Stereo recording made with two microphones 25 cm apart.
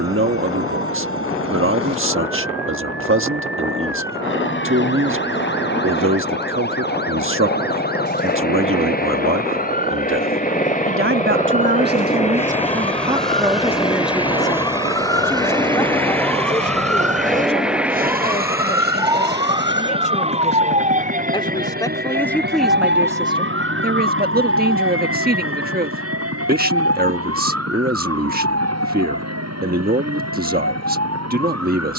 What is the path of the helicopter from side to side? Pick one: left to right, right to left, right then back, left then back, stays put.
left to right.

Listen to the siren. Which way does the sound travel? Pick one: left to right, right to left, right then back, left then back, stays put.
left to right.